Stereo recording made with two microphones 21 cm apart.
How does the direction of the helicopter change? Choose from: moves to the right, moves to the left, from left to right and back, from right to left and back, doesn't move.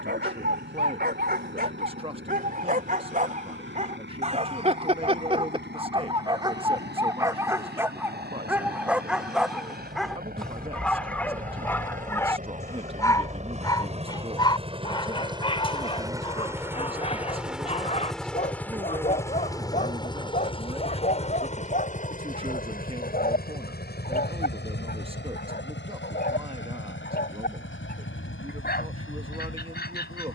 moves to the left.